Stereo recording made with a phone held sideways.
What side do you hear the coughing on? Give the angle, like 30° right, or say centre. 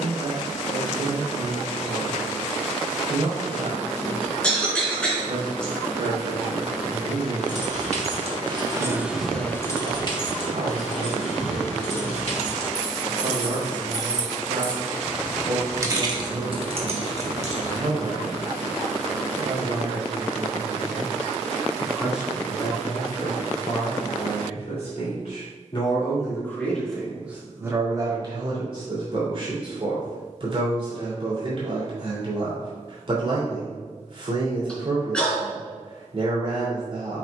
10° left.